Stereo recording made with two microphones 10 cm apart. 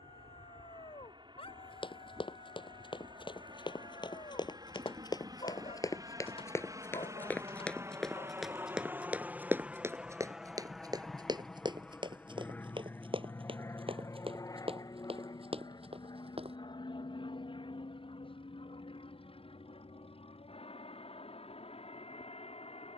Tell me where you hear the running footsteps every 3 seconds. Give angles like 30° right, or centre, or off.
60° left, 50° left, 10° left, 30° right, 60° right, 70° right, off, off.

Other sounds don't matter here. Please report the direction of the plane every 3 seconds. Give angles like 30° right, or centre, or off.
60° right, 50° right, 30° right, centre, 30° left, 50° left, 60° left, 70° left.